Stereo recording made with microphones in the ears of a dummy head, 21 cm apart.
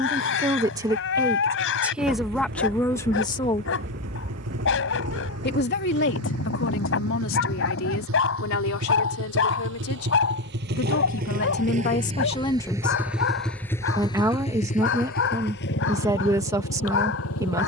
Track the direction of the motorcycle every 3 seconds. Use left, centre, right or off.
right, right, right, right, centre, left.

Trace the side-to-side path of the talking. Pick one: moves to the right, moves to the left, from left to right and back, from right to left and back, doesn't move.
from right to left and back.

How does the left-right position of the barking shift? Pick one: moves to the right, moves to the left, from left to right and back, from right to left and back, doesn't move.
doesn't move.